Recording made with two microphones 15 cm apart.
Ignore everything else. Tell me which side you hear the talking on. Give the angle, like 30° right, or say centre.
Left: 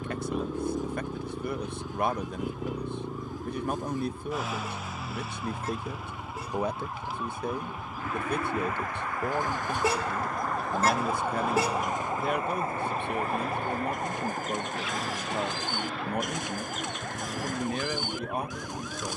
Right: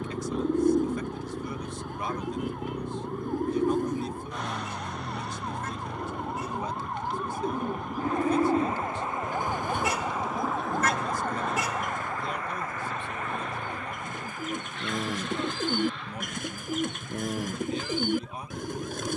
60° left.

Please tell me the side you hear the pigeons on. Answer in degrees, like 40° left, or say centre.
60° right.